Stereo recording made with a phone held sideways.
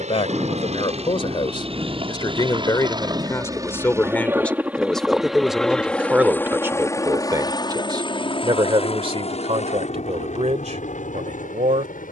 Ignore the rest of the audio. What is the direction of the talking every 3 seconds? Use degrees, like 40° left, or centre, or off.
30° left, 10° left, 20° right, 50° right.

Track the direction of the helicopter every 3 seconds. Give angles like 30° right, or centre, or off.
40° right, 10° right, 20° left, 50° left.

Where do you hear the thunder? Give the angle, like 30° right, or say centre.
20° right.